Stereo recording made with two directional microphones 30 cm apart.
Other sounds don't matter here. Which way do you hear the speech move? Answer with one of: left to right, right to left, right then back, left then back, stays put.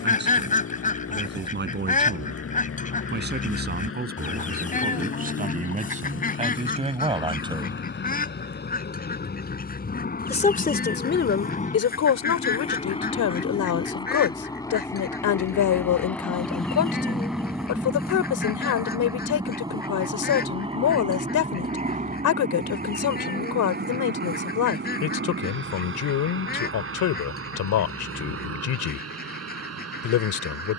right to left.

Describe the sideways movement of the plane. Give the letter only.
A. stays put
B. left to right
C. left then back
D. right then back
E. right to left
B.